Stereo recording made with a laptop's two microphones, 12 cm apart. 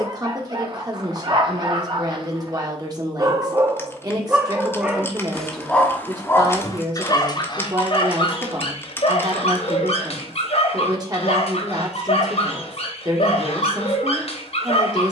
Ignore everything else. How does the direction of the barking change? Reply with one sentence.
In this clip you hear the barking travel towards the left.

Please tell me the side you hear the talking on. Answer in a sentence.
In this clip you hear the talking on the right.